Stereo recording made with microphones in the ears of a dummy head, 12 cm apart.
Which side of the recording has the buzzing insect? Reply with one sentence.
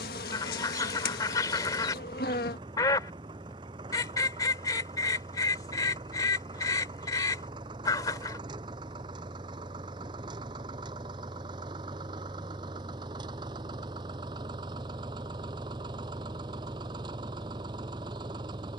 In this clip you hear the buzzing insect on the left.